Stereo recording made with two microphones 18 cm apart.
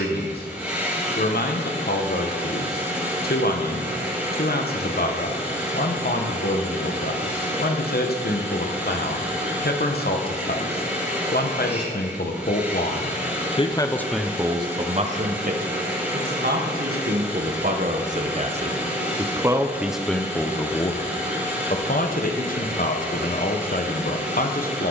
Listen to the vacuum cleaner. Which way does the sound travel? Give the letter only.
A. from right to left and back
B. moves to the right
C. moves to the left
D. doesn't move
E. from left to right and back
D.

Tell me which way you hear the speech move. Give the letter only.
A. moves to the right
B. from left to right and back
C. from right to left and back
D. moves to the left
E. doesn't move
B.